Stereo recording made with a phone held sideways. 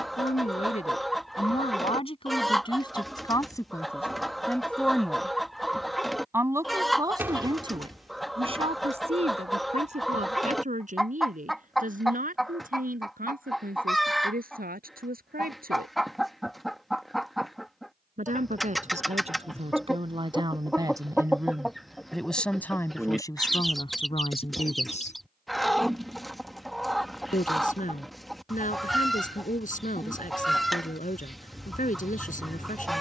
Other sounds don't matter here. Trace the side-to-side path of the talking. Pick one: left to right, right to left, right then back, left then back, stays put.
right then back.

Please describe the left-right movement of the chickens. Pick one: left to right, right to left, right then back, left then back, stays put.
stays put.